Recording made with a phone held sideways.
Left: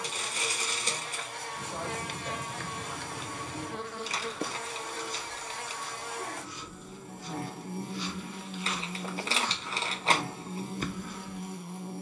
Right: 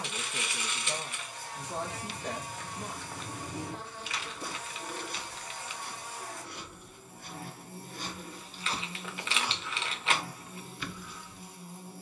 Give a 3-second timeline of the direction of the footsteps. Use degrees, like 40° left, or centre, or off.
50° left, 40° right, 50° right, 20° left.